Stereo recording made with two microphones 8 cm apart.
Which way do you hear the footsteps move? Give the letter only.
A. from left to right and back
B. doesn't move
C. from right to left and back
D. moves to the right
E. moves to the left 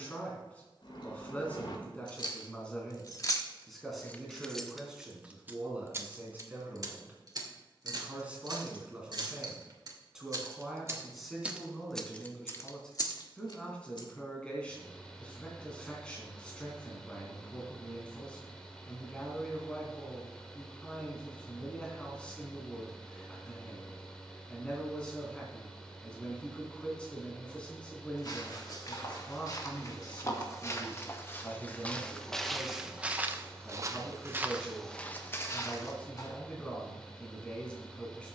A.